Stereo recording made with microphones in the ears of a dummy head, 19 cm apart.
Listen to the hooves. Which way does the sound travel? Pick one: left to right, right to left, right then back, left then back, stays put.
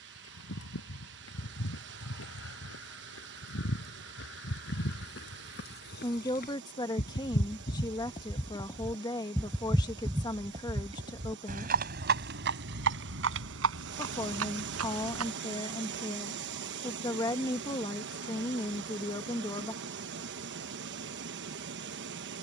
left to right.